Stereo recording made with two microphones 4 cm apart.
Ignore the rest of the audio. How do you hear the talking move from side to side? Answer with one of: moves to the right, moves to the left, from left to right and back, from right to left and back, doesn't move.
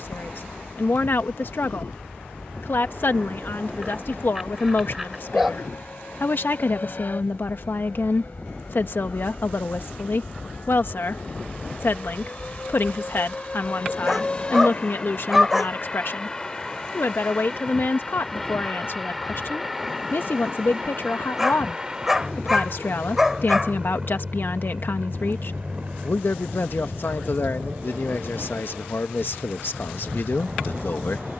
doesn't move.